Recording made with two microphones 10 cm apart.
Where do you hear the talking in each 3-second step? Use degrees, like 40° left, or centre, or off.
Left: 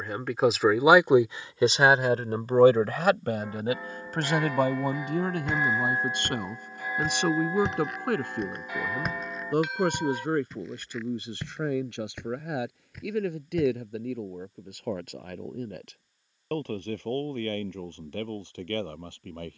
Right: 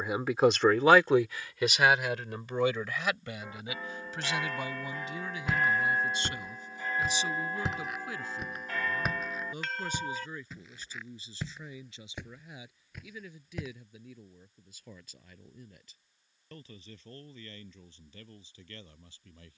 20° left, 60° left, 70° left, 70° left, 80° left, 80° left, 80° left.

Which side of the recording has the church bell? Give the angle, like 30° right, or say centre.
10° left.